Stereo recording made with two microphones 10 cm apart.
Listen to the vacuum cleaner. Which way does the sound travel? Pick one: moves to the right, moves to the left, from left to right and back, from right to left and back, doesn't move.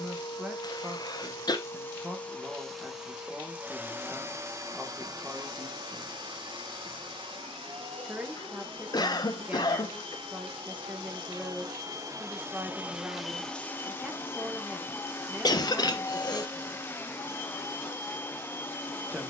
from left to right and back.